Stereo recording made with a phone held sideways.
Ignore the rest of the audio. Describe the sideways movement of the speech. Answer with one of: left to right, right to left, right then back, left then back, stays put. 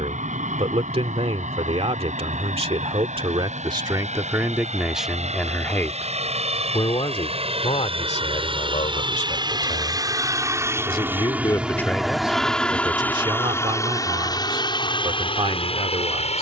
left then back.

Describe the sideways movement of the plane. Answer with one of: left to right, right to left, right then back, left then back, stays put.
right to left.